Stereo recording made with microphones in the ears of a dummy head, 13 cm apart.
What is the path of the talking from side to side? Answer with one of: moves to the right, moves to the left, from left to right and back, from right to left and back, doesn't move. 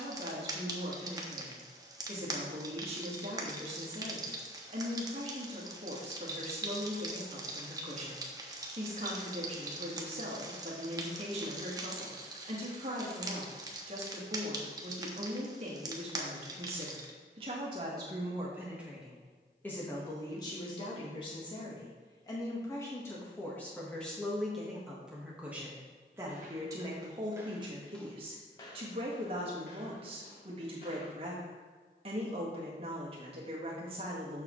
from right to left and back.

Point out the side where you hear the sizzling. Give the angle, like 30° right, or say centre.
30° right.